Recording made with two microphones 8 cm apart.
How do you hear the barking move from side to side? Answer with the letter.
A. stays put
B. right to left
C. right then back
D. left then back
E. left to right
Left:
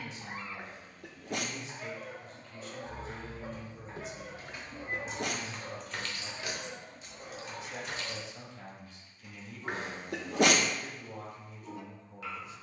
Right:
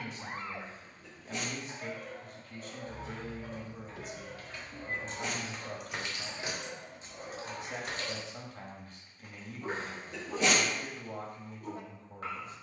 D.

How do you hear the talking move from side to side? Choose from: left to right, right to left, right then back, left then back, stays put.
stays put.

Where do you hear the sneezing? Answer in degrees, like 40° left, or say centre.
60° left.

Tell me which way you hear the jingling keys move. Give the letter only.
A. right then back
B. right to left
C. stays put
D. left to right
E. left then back
D.